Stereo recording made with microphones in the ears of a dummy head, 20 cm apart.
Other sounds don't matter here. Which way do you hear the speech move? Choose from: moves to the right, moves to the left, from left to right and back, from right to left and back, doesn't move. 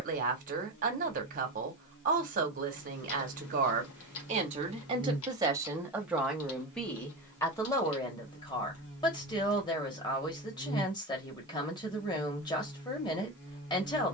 moves to the left.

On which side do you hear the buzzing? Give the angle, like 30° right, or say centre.
50° left.